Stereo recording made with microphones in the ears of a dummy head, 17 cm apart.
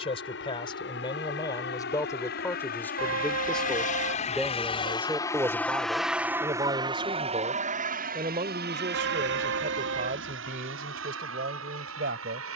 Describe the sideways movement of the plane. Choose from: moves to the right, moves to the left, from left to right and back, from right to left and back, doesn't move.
moves to the right.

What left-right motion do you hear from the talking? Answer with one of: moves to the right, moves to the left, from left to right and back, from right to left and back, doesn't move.
moves to the right.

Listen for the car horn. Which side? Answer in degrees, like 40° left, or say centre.
80° right.